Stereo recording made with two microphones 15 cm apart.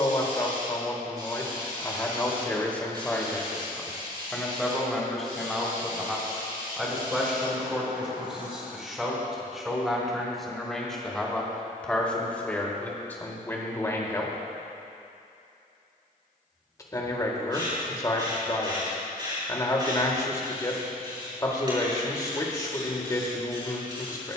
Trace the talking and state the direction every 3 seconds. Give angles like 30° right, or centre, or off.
20° left, centre, centre, centre, 10° left, 20° left, 20° left, 20° left.